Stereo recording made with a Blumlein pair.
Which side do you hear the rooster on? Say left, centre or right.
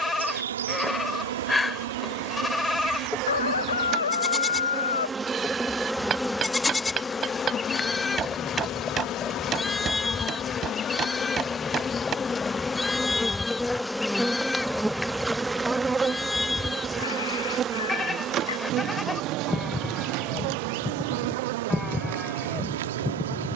left.